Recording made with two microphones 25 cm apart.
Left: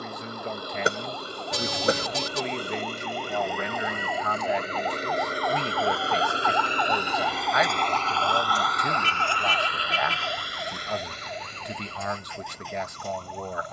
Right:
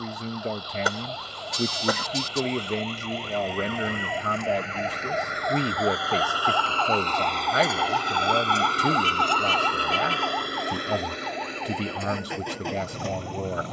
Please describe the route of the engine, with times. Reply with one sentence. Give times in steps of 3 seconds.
You can hear the engine on the left from 0 s, in the centre from 6 s and on the right from 9 s.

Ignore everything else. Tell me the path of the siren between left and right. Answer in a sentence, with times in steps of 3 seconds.
In this clip you hear the siren on the right from 0 s, in the centre from 6 s and on the left from 9 s.